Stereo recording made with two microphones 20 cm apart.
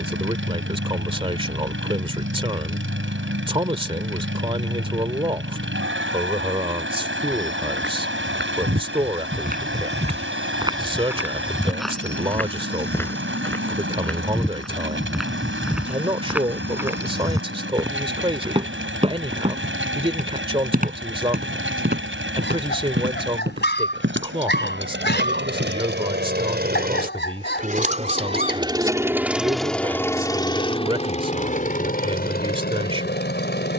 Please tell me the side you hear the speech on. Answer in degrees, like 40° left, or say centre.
30° right.